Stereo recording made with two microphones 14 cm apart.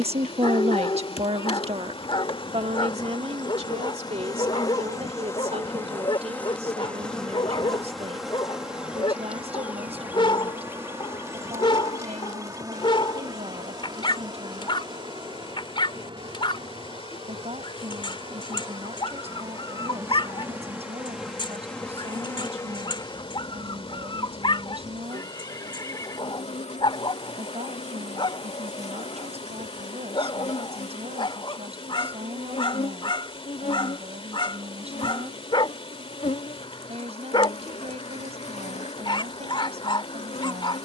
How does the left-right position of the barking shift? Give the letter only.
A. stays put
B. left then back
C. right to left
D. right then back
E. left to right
A.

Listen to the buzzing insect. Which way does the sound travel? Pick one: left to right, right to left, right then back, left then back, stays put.
right then back.